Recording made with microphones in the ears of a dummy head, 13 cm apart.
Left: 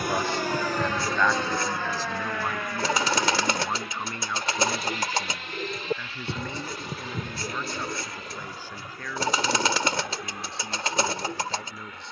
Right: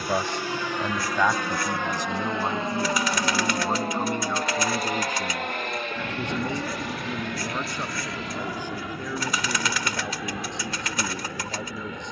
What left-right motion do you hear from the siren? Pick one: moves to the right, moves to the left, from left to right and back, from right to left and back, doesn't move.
moves to the right.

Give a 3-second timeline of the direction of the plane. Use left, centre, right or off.
centre, right, right, right.